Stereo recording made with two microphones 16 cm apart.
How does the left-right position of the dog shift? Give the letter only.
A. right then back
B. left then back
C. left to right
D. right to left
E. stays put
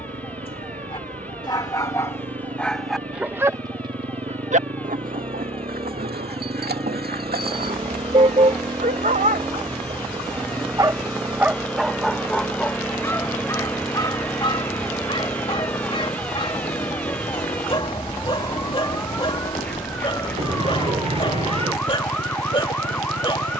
A.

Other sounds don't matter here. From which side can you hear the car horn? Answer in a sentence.
You can hear the car horn on the right.